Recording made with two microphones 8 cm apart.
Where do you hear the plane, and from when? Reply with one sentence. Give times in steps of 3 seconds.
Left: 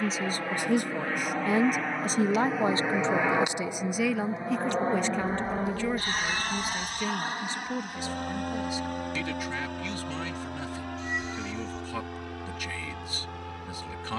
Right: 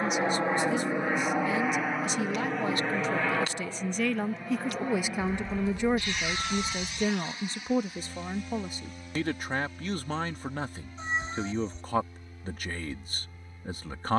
You can hear the plane in the centre from 0 s and on the left from 3 s.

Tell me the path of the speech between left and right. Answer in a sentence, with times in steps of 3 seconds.
In this clip you hear the speech on the left from 0 s, in the centre from 3 s and on the right from 6 s.